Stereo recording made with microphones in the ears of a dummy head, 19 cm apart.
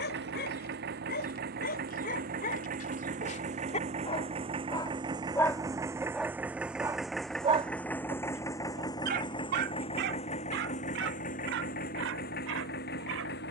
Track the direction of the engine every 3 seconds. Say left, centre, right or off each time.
right, right, centre, left, left.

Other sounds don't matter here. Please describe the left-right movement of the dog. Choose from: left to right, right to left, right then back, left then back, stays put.
left to right.